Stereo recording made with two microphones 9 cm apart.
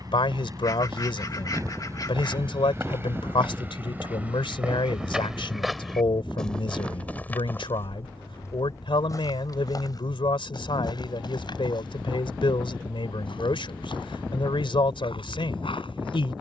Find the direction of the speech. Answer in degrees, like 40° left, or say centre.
70° left.